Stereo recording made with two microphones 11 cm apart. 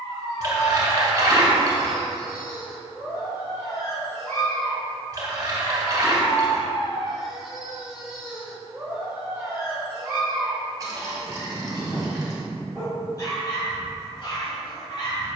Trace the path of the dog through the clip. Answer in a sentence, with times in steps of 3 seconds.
In this clip you hear the dog on the left from 0 s, in the centre from 6 s and on the left from 12 s.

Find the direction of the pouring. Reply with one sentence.
You can hear the pouring on the right.